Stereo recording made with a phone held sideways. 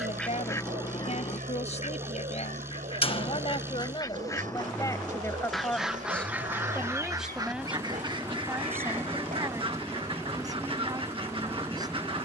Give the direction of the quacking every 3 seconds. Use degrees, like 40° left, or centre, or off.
30° left, 20° left, 30° right, 40° right.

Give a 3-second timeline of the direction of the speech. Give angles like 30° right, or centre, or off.
50° left, 30° left, 10° right, 20° right.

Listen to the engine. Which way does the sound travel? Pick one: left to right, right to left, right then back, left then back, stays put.
stays put.